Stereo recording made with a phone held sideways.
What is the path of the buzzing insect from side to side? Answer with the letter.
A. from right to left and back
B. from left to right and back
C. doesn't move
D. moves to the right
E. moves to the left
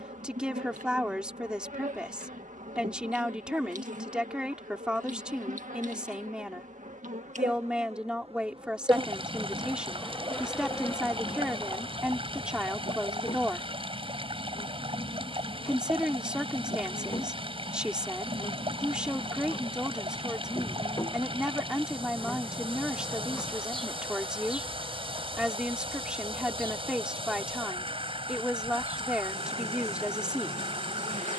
A.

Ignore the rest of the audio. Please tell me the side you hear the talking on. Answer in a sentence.
In this clip you hear the talking in the centre.